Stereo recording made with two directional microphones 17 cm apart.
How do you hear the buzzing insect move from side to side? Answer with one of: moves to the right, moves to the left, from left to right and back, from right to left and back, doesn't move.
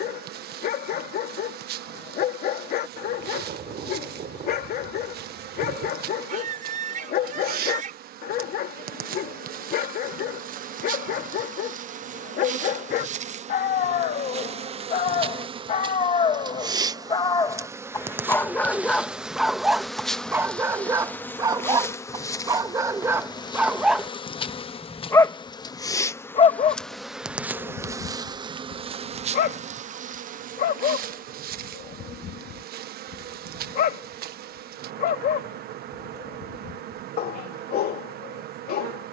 from right to left and back.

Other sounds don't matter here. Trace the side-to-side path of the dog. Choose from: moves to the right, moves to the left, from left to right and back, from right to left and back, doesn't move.
from left to right and back.